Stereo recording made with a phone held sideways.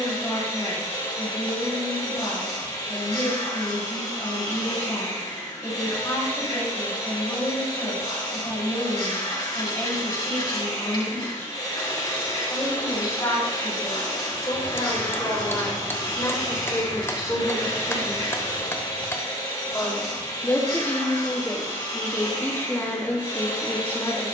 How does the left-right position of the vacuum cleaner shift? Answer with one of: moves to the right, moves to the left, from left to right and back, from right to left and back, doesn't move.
doesn't move.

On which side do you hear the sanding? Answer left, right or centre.
left.